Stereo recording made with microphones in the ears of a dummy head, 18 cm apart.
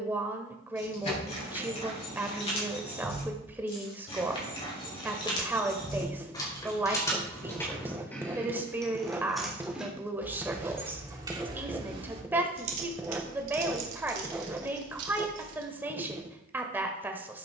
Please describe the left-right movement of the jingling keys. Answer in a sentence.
You can hear the jingling keys move to the right.